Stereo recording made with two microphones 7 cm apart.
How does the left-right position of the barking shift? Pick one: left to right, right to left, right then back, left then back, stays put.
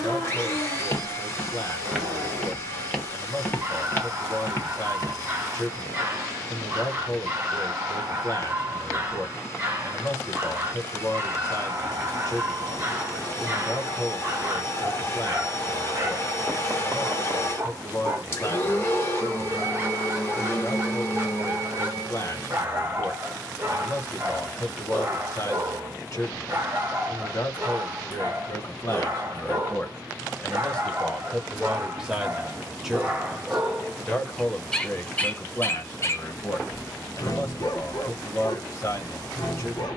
right to left.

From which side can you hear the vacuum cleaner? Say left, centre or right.
left.